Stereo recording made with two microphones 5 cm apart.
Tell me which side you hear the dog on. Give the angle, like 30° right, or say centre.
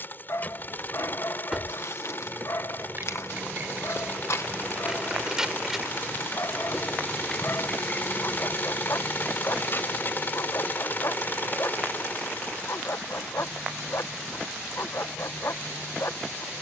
60° left.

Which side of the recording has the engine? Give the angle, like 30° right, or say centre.
40° left.